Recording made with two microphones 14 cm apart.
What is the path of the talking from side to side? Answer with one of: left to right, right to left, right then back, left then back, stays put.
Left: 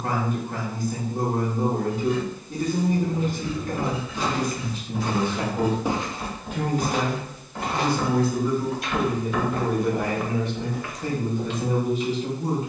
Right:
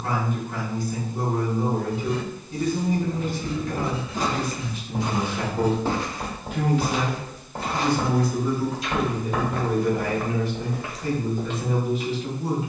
right then back.